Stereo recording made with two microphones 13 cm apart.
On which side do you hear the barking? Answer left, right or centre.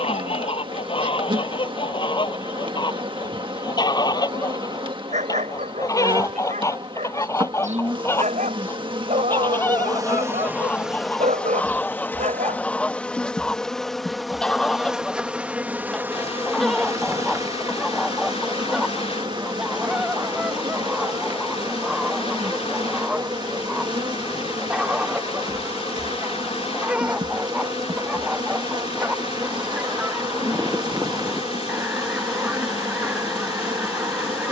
right.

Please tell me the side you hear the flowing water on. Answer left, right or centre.
left.